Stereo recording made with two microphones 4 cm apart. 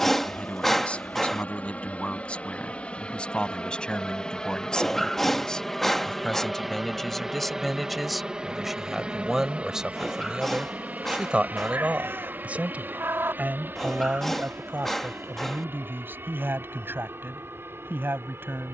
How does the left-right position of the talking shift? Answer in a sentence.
In this clip you hear the talking move to the right.